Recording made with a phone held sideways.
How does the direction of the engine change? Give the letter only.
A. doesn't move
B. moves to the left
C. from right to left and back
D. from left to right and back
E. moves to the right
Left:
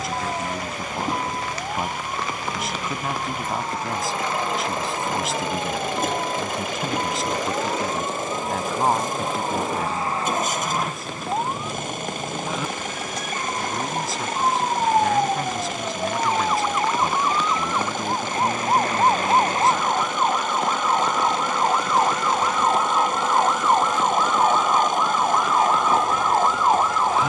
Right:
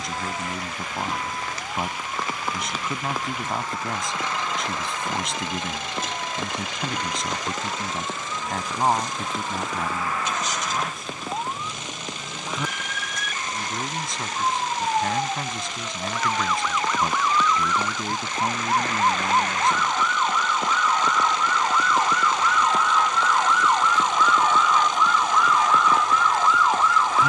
A.